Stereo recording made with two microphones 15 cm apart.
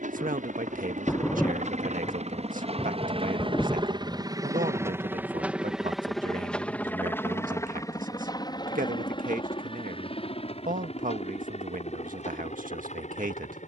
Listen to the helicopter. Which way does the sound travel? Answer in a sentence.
You can hear the helicopter move to the left.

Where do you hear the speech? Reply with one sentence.
You can hear the speech on the right.